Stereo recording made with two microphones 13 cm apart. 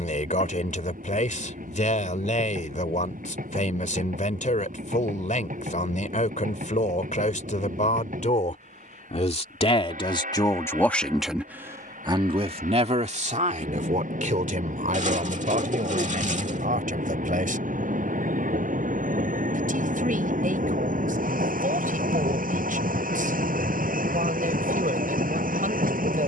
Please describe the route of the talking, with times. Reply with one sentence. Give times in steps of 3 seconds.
In this clip you hear the talking on the left from 0 s and on the right from 12 s.